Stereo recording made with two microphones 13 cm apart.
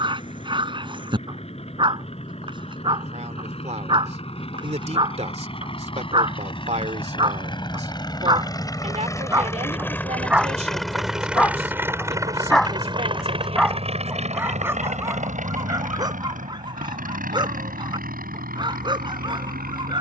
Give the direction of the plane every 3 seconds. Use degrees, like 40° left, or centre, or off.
60° left, 50° left, 40° left, 10° left, 40° right, 70° right, 80° right.